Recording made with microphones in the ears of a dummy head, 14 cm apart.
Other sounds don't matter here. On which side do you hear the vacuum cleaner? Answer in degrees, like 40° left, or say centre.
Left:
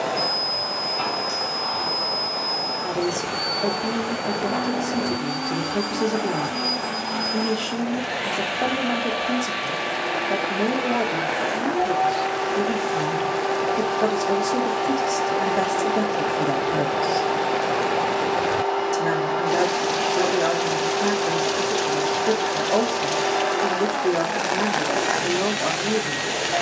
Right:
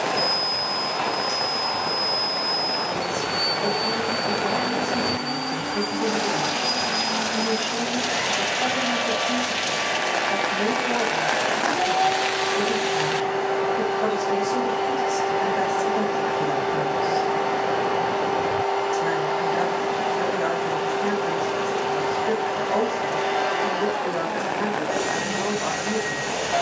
centre.